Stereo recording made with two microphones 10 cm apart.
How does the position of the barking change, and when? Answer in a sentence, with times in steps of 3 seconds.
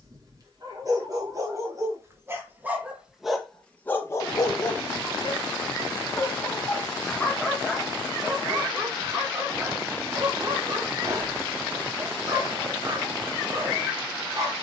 In this clip you hear the barking on the right from 0 s, on the left from 3 s, in the centre from 6 s and on the right from 9 s.